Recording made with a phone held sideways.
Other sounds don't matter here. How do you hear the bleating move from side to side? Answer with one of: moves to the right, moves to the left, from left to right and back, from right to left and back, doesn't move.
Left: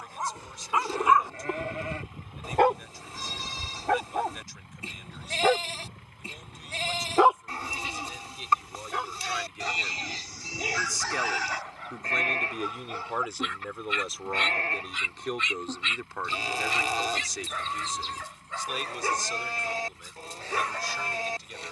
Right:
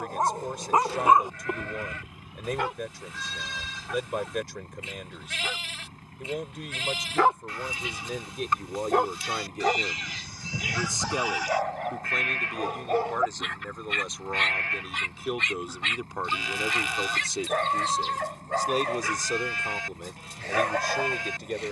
doesn't move.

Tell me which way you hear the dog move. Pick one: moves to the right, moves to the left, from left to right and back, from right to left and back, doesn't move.
from right to left and back.